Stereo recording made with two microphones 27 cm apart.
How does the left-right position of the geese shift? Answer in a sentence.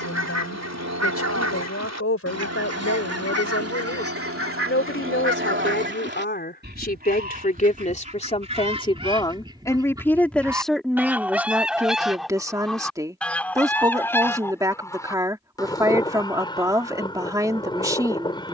You can hear the geese move from right to left.